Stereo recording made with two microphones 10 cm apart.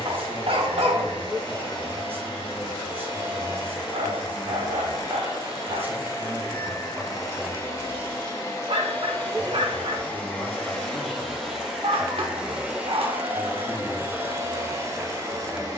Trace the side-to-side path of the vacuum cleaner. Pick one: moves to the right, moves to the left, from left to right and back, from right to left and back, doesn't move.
moves to the right.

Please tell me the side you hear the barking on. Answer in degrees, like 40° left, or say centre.
70° right.